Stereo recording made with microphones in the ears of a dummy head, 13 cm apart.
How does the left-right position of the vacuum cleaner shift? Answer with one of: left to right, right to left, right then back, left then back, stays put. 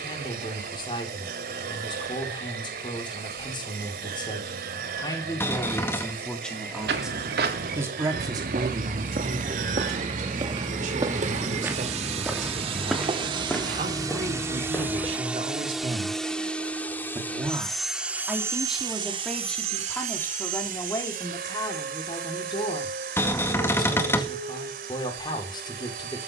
left then back.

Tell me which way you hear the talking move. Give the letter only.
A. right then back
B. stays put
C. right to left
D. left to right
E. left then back
A.